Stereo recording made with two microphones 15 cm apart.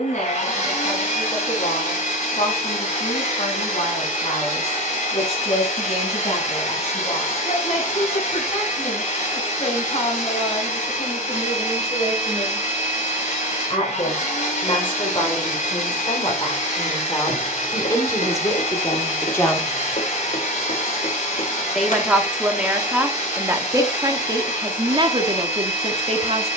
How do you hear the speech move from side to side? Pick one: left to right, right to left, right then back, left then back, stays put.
left to right.